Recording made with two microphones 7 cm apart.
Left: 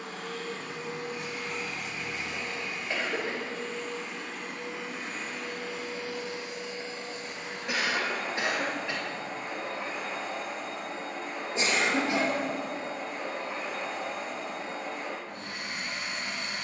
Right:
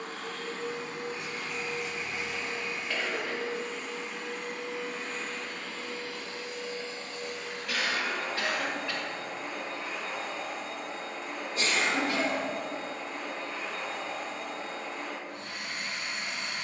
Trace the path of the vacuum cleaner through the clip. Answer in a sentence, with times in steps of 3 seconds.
In this clip you hear the vacuum cleaner on the right from 0 s, in the centre from 3 s and on the left from 6 s.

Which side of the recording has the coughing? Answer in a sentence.
In this clip you hear the coughing on the left.